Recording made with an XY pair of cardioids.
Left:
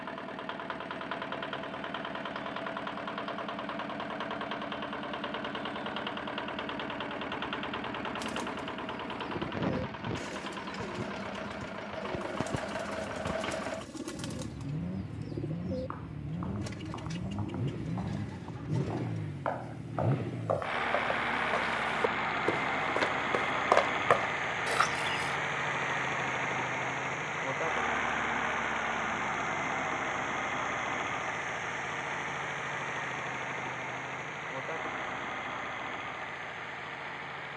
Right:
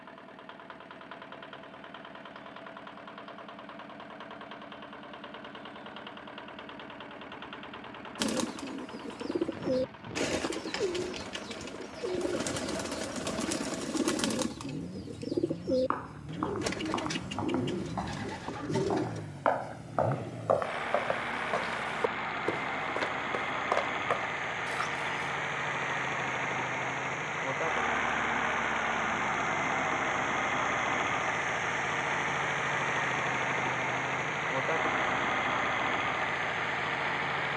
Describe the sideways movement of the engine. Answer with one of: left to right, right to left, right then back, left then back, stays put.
left to right.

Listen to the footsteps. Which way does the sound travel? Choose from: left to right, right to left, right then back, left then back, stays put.
right to left.